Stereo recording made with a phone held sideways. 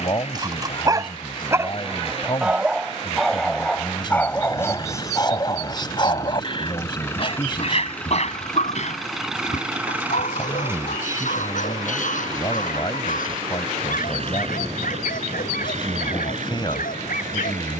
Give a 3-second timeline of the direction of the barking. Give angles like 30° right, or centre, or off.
20° right, 20° left, 50° left, 70° left, 70° left, 80° left.